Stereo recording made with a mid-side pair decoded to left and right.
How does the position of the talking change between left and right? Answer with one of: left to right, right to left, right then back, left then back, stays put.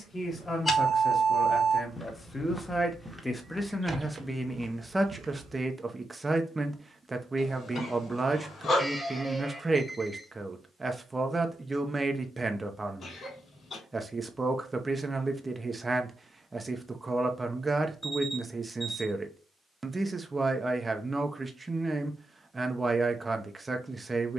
left to right.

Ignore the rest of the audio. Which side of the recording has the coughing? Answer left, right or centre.
left.